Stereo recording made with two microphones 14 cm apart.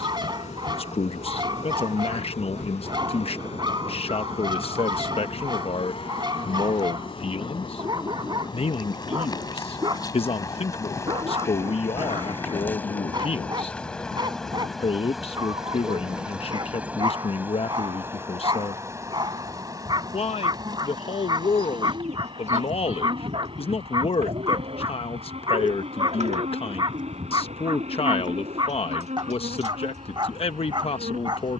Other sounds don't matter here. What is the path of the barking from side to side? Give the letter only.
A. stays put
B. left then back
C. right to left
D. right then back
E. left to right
A.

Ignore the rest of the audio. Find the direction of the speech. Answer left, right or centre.
left.